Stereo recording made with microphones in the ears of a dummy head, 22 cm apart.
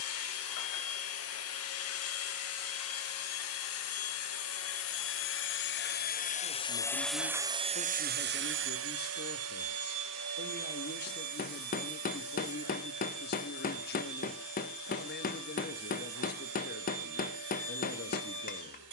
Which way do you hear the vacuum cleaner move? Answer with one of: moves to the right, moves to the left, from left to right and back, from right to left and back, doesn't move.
moves to the right.